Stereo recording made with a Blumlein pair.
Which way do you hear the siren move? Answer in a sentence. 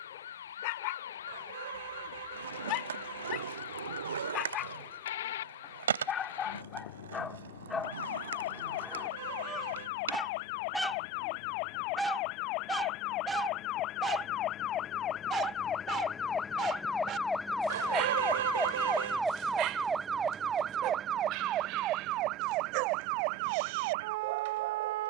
You can hear the siren travel towards the right.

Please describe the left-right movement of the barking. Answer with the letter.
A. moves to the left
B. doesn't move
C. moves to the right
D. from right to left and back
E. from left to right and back
C.